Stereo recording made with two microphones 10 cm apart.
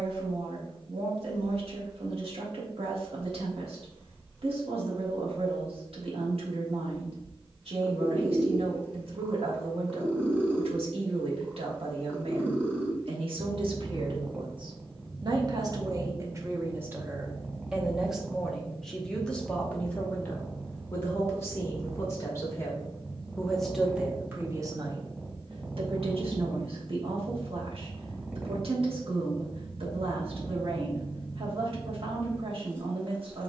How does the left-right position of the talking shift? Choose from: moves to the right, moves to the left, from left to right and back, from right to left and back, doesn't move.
from right to left and back.